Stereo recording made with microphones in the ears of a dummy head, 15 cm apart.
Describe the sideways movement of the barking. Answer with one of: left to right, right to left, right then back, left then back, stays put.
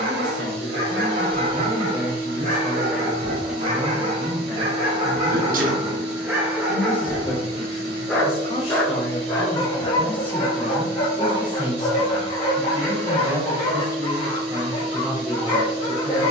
right to left.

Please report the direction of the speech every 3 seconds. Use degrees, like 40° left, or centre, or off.
20° right, 10° left, 30° left, 10° left, 20° right, 20° right.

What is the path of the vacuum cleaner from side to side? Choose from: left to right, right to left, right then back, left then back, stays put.
stays put.